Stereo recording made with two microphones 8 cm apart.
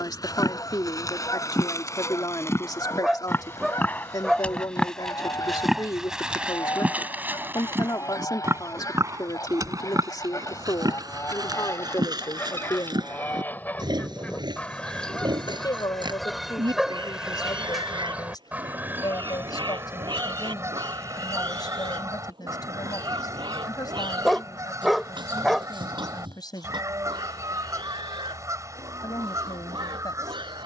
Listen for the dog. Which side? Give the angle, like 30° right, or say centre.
centre.